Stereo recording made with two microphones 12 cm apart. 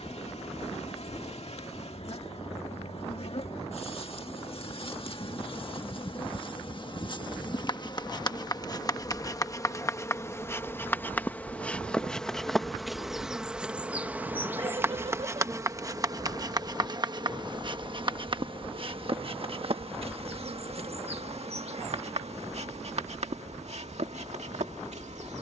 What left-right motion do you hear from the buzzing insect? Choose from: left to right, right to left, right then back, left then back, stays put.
left to right.